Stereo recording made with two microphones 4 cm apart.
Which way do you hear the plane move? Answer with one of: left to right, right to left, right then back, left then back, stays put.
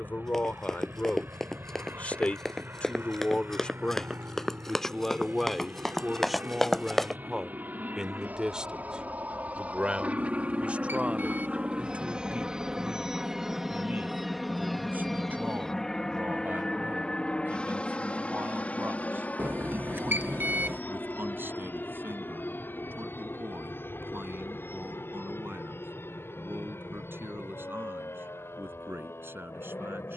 right to left.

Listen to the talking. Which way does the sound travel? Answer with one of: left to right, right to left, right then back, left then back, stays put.
left to right.